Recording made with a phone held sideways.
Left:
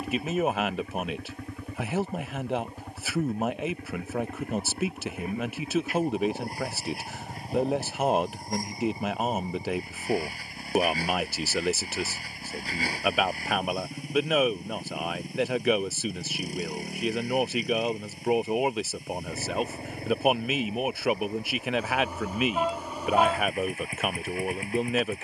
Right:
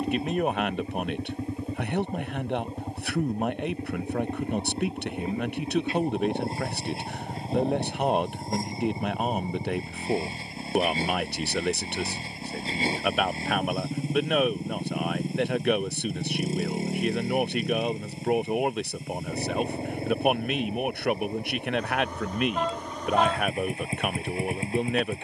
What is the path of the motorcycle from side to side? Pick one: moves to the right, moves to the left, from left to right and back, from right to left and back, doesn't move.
doesn't move.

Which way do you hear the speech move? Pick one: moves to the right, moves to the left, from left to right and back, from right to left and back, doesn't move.
doesn't move.